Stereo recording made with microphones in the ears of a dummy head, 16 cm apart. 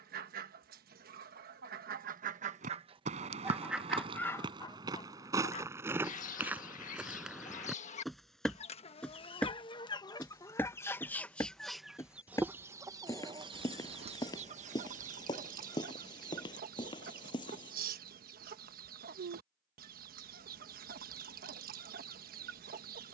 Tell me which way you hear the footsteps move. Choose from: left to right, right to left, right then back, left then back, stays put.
right to left.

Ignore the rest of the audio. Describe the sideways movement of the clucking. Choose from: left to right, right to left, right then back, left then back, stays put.
left then back.